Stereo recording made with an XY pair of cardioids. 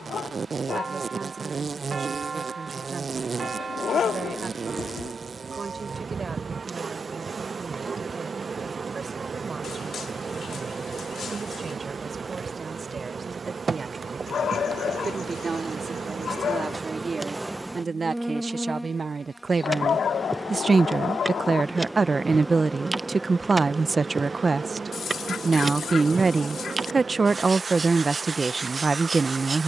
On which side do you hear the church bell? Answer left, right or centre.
right.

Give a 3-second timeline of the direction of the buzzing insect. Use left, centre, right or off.
right, right, right, right, right, right, centre, centre, right, right.